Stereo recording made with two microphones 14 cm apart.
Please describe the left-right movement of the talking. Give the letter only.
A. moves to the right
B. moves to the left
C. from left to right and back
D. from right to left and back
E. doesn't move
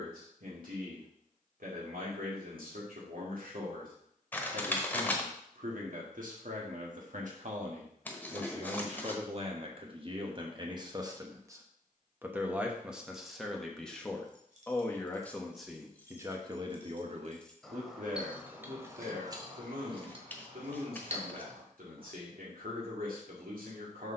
D.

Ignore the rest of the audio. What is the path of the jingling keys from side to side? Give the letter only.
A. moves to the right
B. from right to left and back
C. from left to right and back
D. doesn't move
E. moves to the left
B.